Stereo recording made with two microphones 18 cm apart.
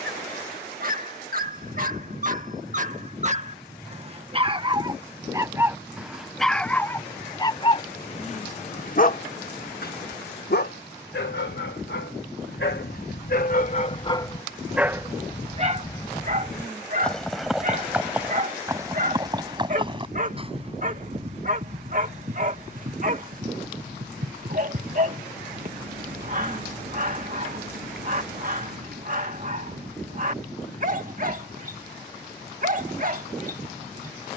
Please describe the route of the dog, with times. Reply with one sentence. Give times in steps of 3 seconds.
You can hear the dog on the right from 0 s, on the left from 6 s and on the right from 15 s.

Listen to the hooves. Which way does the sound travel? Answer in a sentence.
You can hear the hooves move to the right.